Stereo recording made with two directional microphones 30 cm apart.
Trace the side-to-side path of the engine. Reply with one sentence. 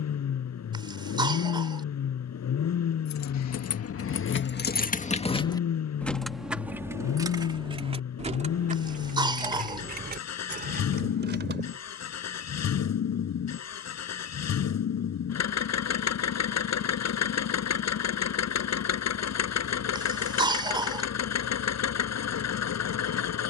In this clip you hear the engine stay put.